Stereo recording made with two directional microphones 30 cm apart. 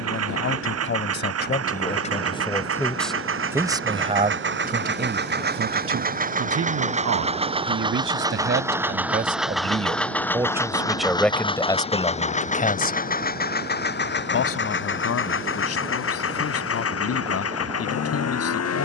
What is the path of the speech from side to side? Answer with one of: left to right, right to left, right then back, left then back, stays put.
right then back.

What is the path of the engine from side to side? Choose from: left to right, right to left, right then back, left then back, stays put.
right to left.